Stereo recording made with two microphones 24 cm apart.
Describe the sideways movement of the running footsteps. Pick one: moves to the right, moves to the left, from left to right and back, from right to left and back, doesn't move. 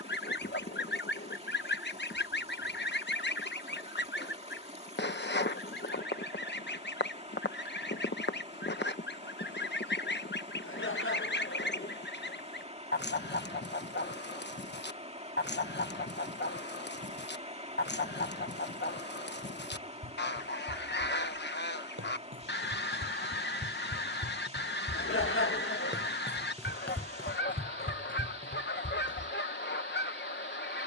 moves to the left.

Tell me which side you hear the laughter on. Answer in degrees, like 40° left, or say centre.
60° left.